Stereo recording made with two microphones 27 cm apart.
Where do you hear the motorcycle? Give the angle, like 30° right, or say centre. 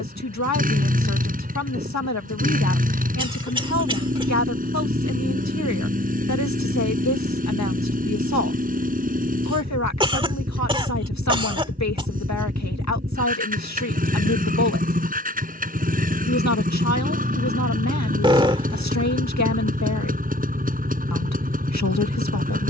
30° right.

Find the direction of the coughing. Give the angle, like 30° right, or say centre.
20° right.